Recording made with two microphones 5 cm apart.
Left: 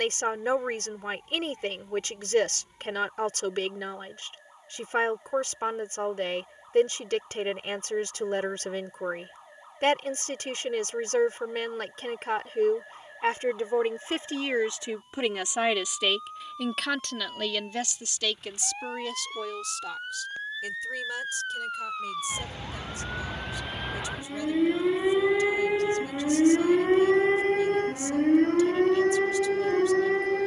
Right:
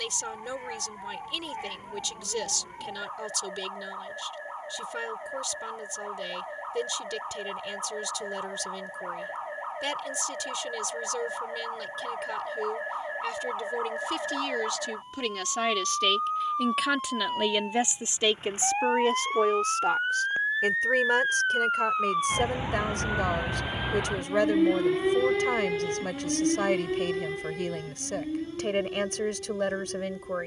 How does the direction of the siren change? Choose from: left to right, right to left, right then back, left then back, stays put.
right to left.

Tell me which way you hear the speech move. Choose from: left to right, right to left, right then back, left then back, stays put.
left to right.